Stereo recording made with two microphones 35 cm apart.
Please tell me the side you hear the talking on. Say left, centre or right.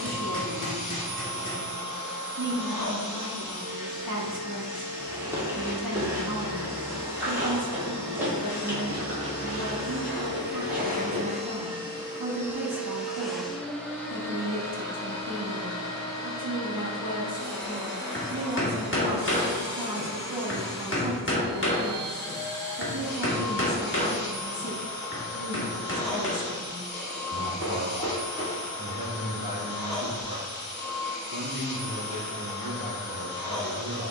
right.